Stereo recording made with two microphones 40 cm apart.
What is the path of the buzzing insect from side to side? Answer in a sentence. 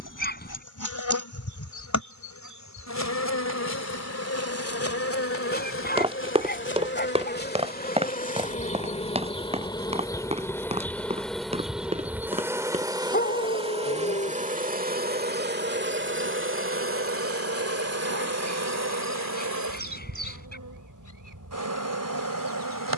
In this clip you hear the buzzing insect move from left to right.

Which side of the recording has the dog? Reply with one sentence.
In this clip you hear the dog on the left.